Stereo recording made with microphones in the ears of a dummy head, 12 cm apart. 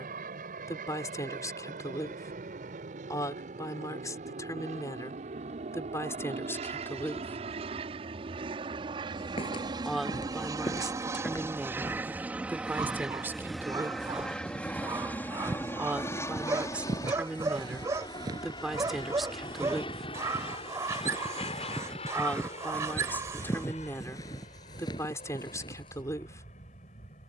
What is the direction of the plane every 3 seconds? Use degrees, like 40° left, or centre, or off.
70° right, 60° right, 50° right, 30° right, centre, 20° left, 40° left, 50° left, 50° left.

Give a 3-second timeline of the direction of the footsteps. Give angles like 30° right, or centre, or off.
off, off, off, 30° left, centre, 30° right, 20° right, 10° left, 30° left.